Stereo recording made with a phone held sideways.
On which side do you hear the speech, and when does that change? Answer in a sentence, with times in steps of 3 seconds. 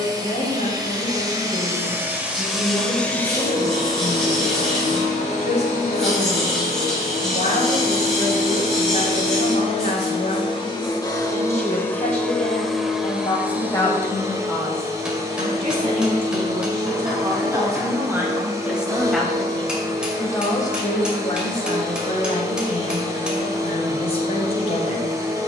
You can hear the speech on the left from 0 s, on the right from 15 s, in the centre from 18 s and on the left from 21 s.